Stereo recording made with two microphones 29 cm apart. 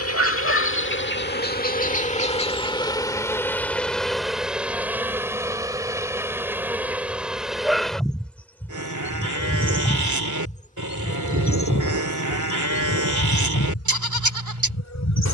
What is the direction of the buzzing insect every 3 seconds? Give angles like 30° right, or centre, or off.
30° left, centre, centre, 30° left, 60° left.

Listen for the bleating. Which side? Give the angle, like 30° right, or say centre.
90° right.